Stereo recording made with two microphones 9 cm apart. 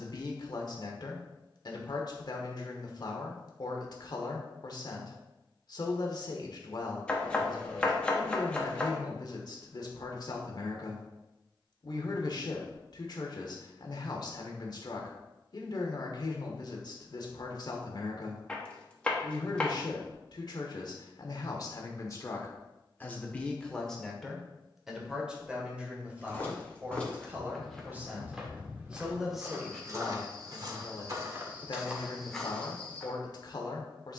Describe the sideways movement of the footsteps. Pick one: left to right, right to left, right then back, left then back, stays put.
right then back.